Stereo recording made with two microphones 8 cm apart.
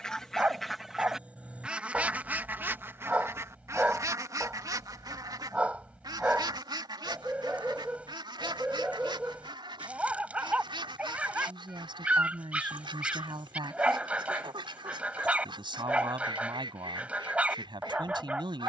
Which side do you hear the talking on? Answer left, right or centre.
right.